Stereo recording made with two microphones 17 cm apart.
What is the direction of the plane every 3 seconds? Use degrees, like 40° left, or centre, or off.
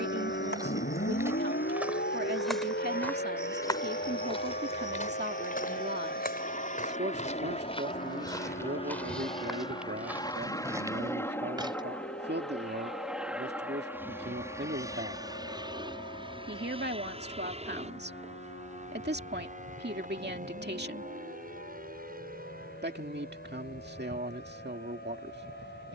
70° left, 60° left, 40° left, 20° left, 10° right, 30° right, 40° right, 50° right, 60° right.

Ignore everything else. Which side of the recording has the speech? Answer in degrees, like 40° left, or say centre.
80° right.